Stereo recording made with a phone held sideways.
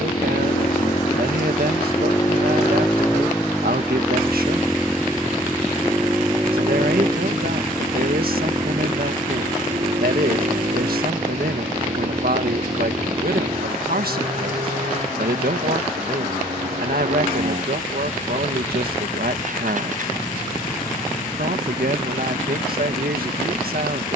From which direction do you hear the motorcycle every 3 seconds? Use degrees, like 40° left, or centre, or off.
30° left, centre, 20° right, 40° right, 50° right, 50° right, 60° right, 60° right.